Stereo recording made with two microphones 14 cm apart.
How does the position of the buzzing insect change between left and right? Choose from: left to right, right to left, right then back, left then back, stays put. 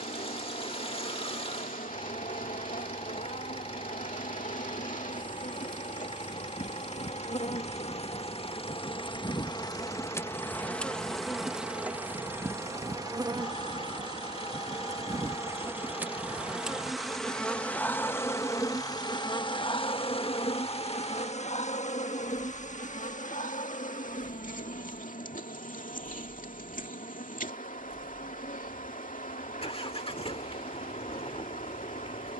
right then back.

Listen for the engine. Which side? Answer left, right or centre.
left.